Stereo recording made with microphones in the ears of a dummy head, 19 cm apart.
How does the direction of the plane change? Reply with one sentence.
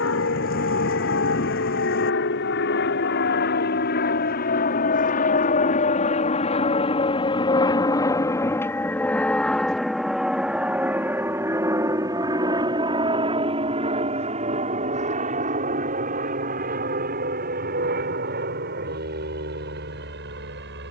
In this clip you hear the plane move to the right.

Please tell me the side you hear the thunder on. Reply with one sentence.
In this clip you hear the thunder on the left.